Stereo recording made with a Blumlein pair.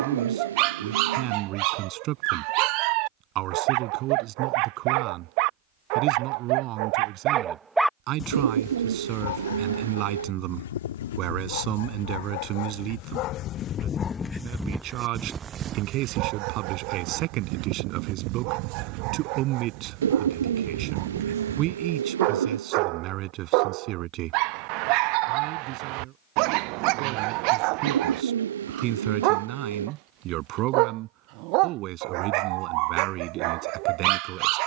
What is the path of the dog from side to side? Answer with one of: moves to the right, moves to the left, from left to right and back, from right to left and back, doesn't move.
from right to left and back.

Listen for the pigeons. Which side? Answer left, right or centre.
right.